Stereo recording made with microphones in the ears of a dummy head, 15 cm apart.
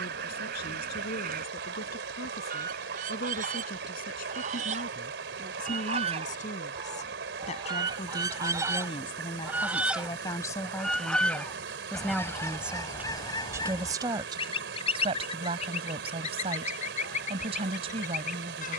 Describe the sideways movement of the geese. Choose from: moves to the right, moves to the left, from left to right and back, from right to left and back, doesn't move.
moves to the left.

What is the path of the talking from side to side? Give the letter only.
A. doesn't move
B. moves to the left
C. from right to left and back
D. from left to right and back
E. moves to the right
E.